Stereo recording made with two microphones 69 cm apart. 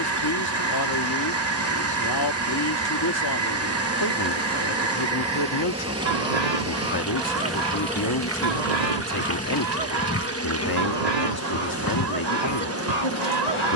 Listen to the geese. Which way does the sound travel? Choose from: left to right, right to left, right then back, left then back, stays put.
stays put.